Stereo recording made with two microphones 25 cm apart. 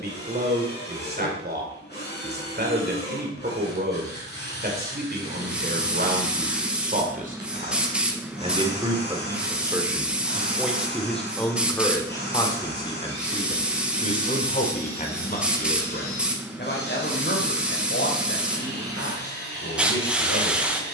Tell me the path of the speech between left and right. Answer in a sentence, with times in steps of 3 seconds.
You can hear the speech on the right from 0 s, in the centre from 9 s and on the left from 12 s.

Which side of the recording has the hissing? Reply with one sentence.
You can hear the hissing in the centre.